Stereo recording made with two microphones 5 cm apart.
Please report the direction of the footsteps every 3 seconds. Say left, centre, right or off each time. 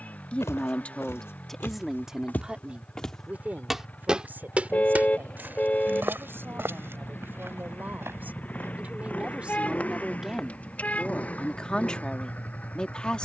left, right, right, off, off.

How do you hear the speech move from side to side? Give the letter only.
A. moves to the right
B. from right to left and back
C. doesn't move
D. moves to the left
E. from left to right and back
E.